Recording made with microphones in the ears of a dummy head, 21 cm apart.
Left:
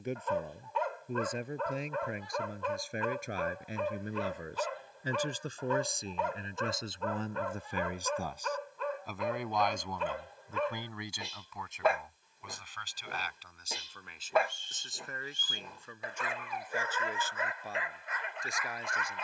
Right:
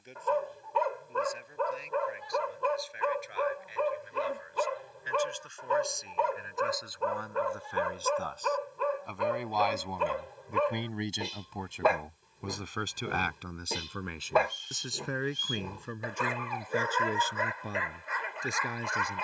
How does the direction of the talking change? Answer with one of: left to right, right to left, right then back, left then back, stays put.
left to right.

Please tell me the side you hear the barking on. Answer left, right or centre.
right.